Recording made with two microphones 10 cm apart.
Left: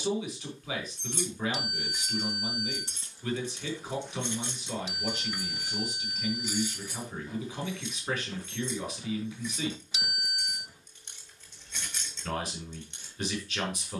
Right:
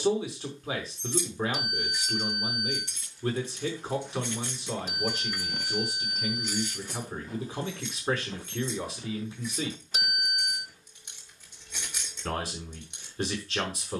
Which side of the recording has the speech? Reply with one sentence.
In this clip you hear the speech on the right.